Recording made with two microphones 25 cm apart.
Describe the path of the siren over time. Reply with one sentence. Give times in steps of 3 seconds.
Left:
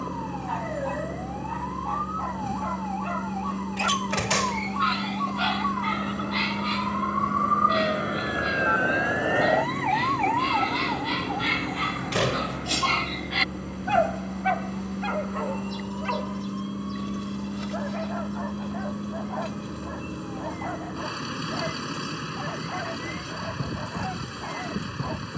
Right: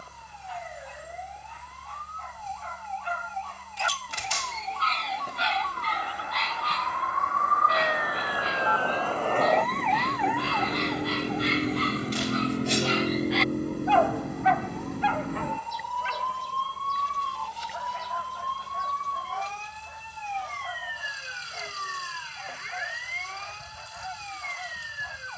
You can hear the siren on the left from 0 s, in the centre from 9 s and on the right from 12 s.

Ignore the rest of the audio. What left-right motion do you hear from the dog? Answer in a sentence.
You can hear the dog move from left to right and back again.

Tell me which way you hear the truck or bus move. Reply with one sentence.
You can hear the truck or bus stay put.